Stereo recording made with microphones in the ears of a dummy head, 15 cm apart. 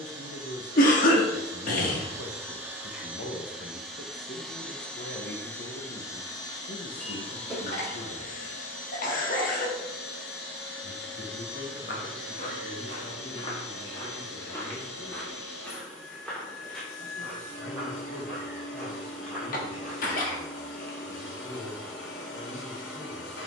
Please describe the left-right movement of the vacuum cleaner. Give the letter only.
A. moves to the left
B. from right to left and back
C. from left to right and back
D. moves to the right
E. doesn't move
A.